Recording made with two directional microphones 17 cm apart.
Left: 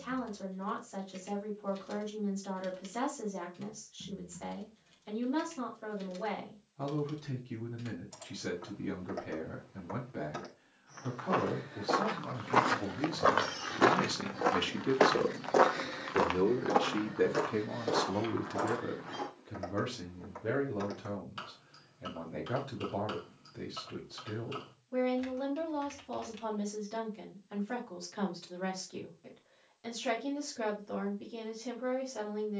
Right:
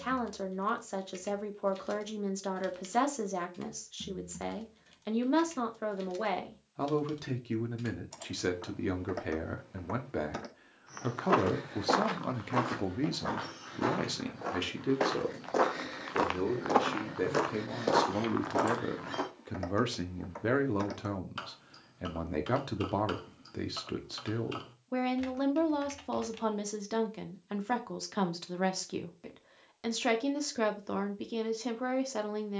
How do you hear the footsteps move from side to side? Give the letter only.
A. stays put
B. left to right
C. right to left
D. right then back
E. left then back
E.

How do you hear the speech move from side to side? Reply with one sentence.
In this clip you hear the speech go left and come back.